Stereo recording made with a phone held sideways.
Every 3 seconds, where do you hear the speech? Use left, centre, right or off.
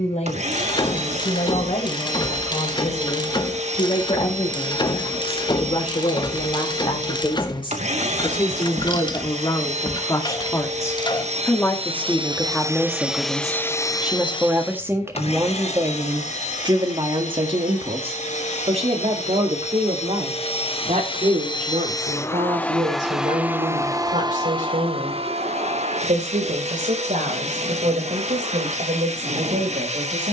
left, left, left, left, centre, right, right, right, right, right.